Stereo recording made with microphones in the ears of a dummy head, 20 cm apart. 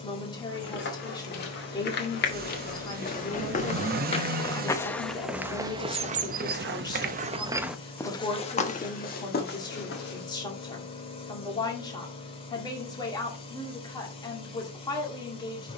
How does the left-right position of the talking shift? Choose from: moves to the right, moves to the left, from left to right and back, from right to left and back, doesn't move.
doesn't move.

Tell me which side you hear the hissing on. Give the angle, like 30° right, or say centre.
30° left.